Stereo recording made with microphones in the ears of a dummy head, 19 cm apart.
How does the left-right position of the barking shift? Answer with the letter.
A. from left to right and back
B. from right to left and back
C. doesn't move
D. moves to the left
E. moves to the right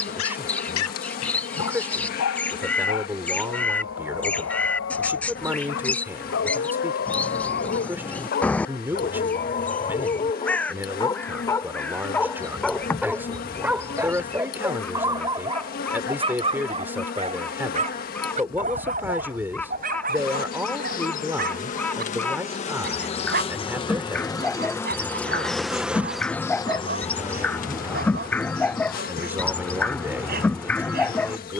E.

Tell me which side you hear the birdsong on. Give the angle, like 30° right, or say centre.
10° left.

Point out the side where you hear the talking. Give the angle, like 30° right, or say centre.
10° right.